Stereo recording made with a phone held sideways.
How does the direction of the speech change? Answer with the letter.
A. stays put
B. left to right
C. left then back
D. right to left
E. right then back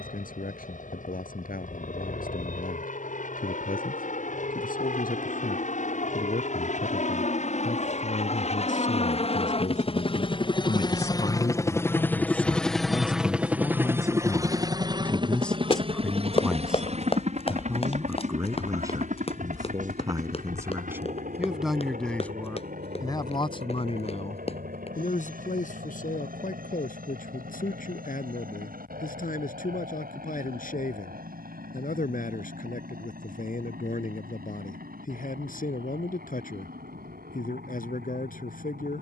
E.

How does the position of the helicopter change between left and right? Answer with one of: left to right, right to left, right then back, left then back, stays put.
left to right.